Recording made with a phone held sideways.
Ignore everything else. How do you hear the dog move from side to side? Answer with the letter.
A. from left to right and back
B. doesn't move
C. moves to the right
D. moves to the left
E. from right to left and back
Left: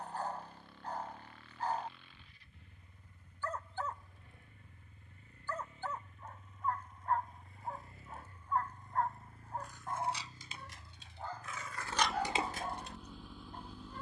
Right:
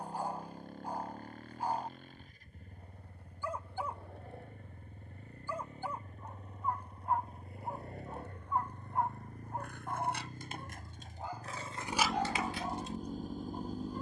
B.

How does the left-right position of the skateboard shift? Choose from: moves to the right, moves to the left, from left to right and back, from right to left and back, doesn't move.
moves to the left.